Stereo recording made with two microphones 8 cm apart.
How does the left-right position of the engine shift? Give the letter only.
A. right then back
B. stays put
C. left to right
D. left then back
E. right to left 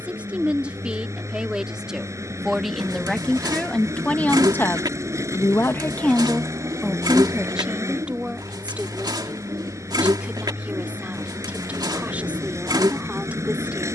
B.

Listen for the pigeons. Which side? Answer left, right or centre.
right.